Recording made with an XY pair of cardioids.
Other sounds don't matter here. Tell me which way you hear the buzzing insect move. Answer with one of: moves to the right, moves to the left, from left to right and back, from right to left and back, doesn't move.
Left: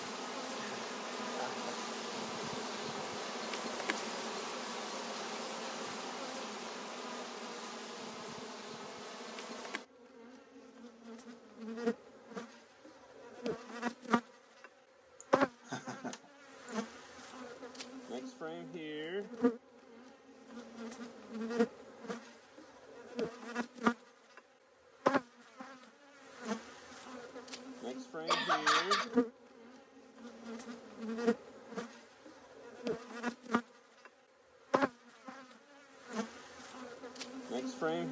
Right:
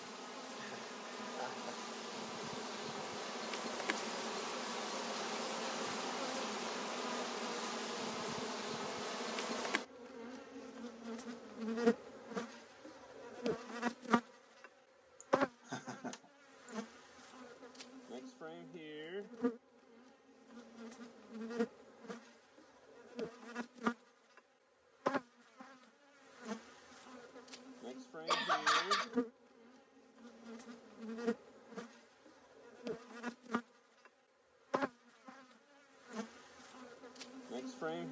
from left to right and back.